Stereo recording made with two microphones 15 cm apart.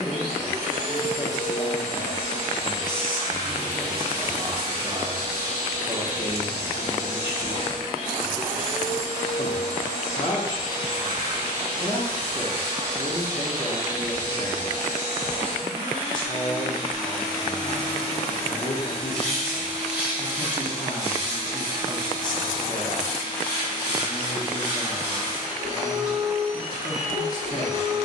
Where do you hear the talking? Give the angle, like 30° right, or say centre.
30° left.